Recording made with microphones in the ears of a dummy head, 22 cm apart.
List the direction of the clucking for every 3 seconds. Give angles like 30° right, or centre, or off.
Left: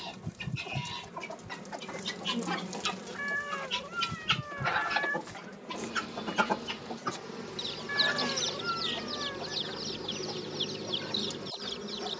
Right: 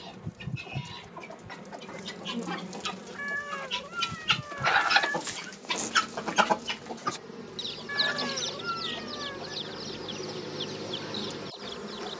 10° left, 30° right, 10° right, 10° left.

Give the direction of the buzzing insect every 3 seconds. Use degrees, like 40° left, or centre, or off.
10° right, 10° left, 10° left, 20° right.